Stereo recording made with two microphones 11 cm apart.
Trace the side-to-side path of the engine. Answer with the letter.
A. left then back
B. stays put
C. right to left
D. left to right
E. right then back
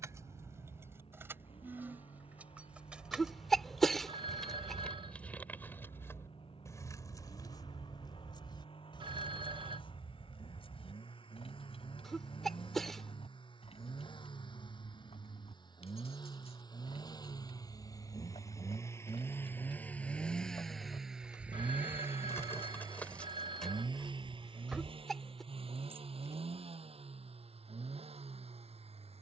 D.